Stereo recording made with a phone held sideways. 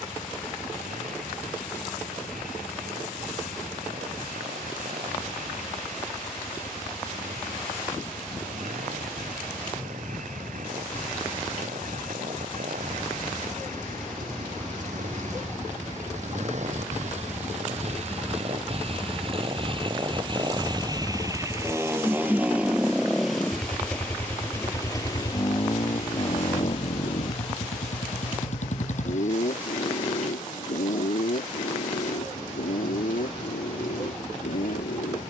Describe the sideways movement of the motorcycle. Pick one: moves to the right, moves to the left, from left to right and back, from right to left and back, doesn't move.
moves to the left.